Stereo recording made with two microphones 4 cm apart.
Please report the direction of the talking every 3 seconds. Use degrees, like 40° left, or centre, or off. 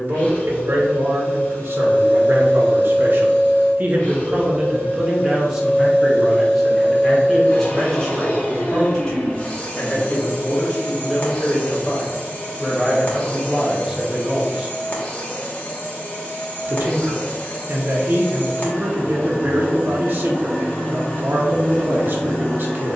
60° right, 20° right, 10° left, 20° left, 10° right, 50° right, 50° right, 50° right.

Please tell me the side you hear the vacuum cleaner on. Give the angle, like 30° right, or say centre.
30° left.